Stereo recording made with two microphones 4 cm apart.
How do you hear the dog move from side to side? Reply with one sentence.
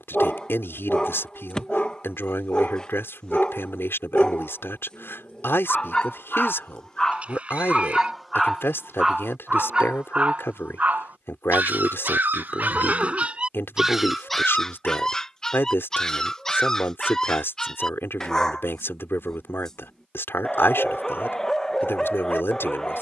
You can hear the dog move from left to right and back again.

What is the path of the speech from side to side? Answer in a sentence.
In this clip you hear the speech stay in one place.